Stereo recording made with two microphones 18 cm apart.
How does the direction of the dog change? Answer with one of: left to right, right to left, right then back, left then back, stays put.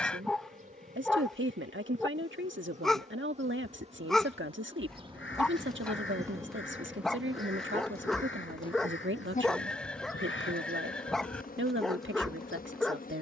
stays put.